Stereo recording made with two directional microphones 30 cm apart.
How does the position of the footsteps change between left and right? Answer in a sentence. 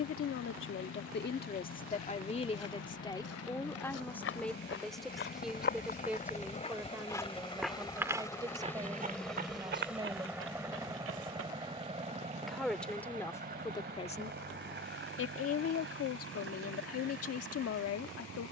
In this clip you hear the footsteps go from the left side to the right.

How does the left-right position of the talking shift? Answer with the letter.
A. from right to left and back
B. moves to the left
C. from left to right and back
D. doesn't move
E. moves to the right
C.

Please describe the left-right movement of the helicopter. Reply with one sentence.
You can hear the helicopter move from left to right.